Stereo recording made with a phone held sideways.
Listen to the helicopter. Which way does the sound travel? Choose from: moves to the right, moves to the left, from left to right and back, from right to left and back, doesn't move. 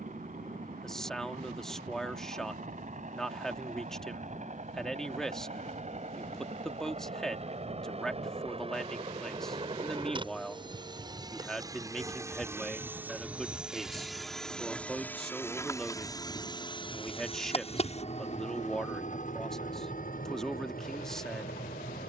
moves to the left.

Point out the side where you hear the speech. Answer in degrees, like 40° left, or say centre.
centre.